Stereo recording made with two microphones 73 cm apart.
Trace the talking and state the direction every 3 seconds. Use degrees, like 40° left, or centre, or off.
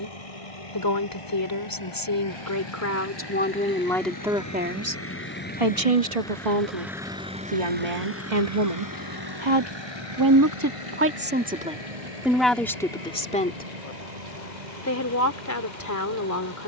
30° left, 10° right, 60° right, 20° right, 10° left, 20° left.